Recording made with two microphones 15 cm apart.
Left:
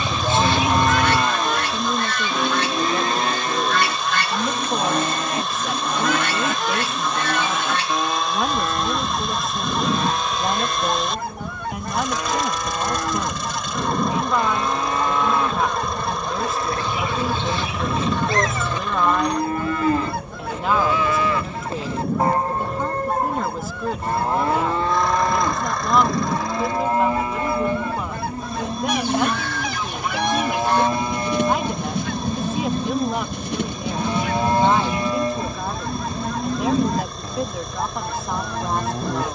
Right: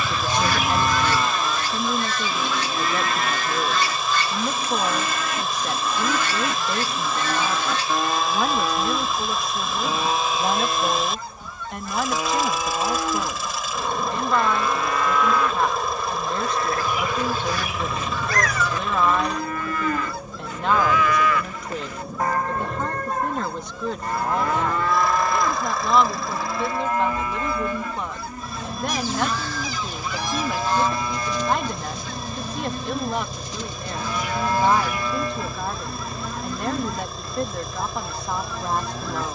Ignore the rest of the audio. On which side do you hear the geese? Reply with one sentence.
In this clip you hear the geese on the left.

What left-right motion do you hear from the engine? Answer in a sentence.
In this clip you hear the engine stay put.